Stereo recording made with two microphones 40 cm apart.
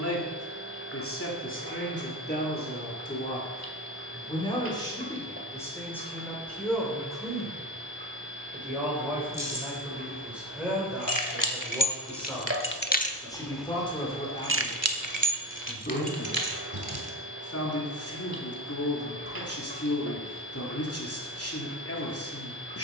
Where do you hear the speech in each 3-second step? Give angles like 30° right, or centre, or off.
30° left, 10° left, centre, centre, 10° left, 30° left, 40° left, 40° left.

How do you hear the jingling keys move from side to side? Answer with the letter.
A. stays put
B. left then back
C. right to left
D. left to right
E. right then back
D.